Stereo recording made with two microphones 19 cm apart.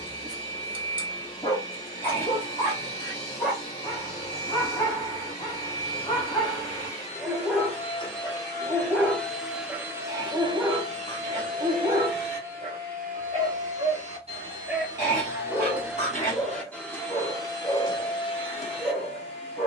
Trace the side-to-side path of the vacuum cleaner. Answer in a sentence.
In this clip you hear the vacuum cleaner go right and come back.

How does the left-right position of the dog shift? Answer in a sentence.
In this clip you hear the dog move from left to right and back again.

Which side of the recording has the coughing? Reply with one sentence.
In this clip you hear the coughing on the left.